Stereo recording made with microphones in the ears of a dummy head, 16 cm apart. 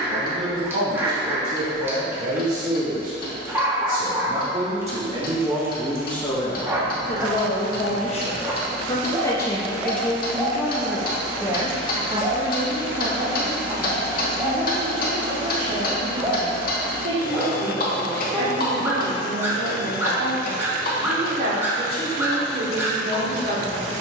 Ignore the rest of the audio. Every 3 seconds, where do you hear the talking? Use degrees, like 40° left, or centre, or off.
60° right, 40° right, 30° left, centre, 40° right, 50° right, 60° right, 60° right.